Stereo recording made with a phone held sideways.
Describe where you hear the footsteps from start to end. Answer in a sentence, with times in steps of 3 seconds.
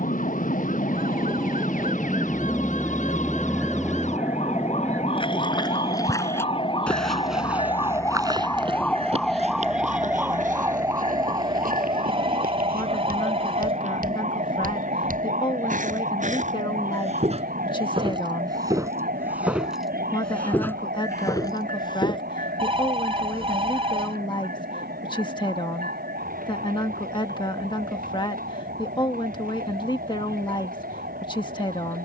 In this clip you hear the footsteps not at all from 0 s, on the left from 3 s, in the centre from 6 s, on the right from 9 s, in the centre from 18 s, on the left from 21 s and not at all from 24 s.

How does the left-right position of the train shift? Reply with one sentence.
You can hear the train move to the right.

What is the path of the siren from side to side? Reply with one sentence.
You can hear the siren go from the left side to the right.